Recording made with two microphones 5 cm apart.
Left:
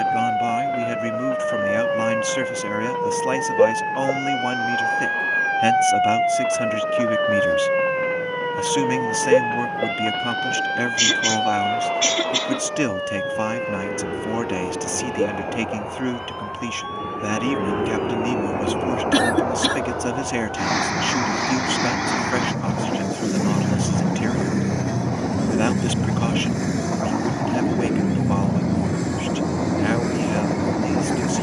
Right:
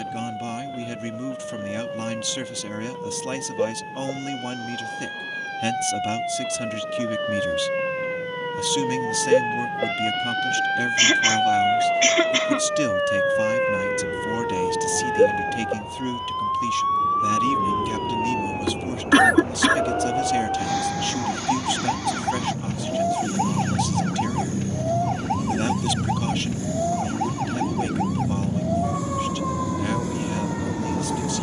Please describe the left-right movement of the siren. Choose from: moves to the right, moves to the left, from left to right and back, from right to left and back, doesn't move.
moves to the right.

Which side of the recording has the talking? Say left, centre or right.
left.